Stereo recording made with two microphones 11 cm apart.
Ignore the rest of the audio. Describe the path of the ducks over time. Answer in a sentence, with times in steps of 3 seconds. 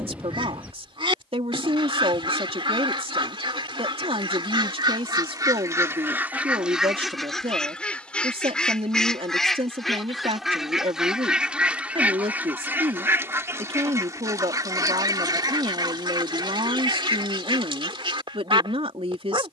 You can hear the ducks on the right from 0 s, in the centre from 6 s and on the right from 12 s.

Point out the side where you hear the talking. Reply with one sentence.
You can hear the talking on the right.